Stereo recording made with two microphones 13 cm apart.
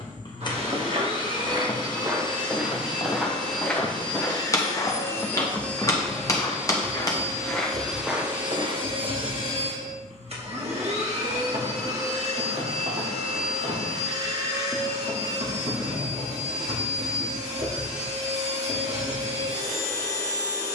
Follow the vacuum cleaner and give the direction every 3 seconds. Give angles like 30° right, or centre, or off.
40° left, 30° left, 20° right, 50° right, 60° right, 60° right, 60° right.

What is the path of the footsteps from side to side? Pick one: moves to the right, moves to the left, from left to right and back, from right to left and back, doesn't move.
from right to left and back.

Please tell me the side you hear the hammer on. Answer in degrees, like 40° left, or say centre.
30° left.